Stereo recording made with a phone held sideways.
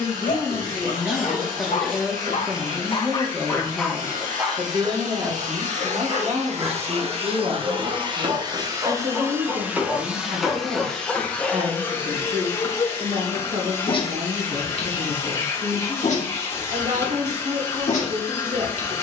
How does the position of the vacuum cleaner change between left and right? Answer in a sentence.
You can hear the vacuum cleaner go from the right side to the left.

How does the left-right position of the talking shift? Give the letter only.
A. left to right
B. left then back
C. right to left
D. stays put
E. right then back
A.